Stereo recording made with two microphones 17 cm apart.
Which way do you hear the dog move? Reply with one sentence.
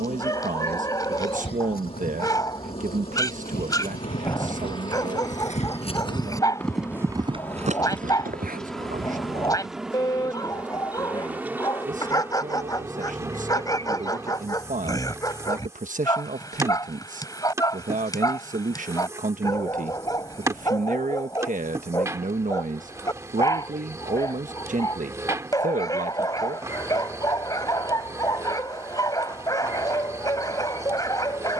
You can hear the dog stay in one place.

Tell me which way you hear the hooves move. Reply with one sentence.
You can hear the hooves go from the left side to the right.